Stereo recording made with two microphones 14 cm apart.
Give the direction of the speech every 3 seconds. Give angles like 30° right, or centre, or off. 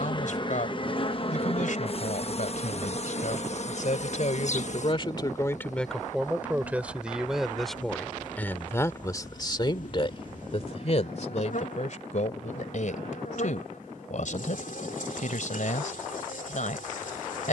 70° left, 50° left, centre, 40° left, 70° left, 70° left.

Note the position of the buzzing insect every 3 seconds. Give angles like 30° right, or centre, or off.
40° left, 60° left, 70° left, 70° left, 70° left, 70° left.